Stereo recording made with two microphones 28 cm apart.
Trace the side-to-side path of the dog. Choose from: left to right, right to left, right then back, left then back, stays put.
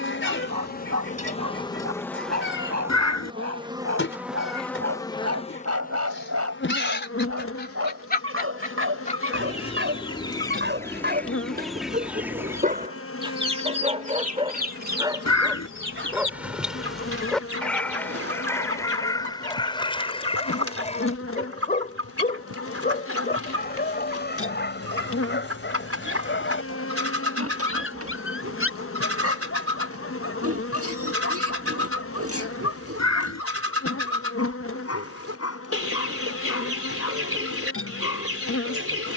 right to left.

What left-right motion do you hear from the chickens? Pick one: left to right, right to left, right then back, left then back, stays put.
left to right.